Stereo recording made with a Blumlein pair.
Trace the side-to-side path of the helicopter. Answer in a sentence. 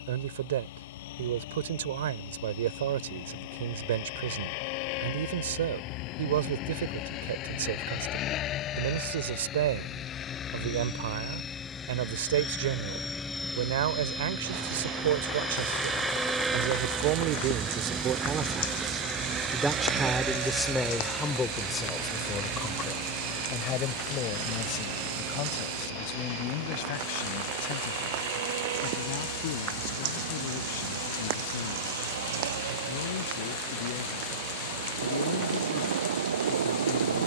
You can hear the helicopter go from the left side to the right.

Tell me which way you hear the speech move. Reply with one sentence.
In this clip you hear the speech move from right to left.